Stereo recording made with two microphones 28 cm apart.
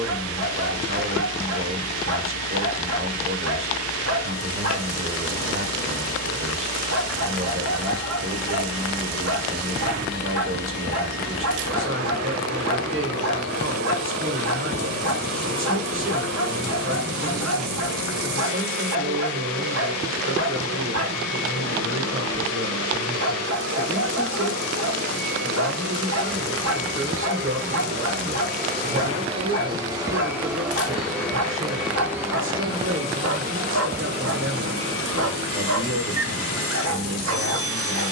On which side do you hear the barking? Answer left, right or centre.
right.